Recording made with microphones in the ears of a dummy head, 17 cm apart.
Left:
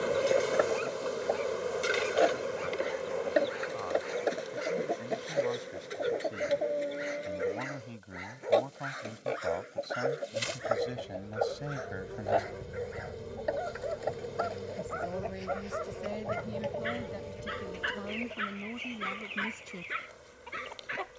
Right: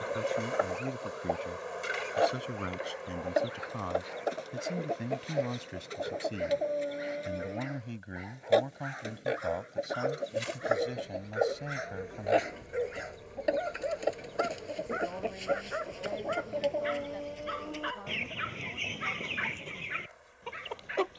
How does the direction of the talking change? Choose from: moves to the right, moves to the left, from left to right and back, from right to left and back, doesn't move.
moves to the left.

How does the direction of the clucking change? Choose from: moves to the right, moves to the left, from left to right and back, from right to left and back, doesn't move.
moves to the right.